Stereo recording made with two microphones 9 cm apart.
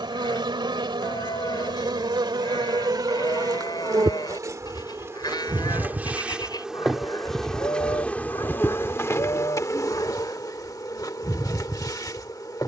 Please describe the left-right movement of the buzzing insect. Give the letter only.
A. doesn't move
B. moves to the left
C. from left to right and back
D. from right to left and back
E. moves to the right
B.